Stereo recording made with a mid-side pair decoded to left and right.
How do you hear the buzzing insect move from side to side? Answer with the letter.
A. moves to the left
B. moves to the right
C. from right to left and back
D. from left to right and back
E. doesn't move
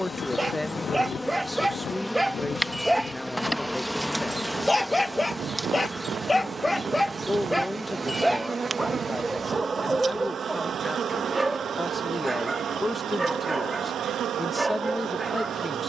B.